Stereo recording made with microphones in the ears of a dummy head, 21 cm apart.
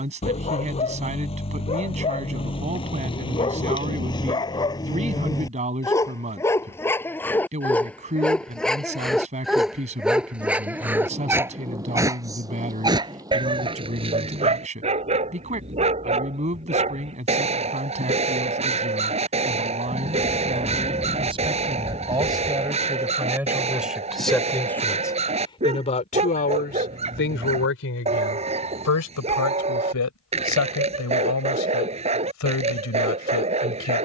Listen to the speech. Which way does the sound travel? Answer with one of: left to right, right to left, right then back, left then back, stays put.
right to left.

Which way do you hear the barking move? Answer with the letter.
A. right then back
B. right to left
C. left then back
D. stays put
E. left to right
E.